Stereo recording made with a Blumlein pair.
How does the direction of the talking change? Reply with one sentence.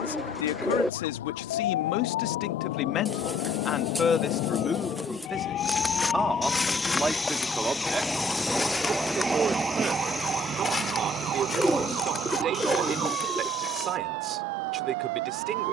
In this clip you hear the talking move from left to right.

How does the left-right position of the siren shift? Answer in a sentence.
You can hear the siren move to the right.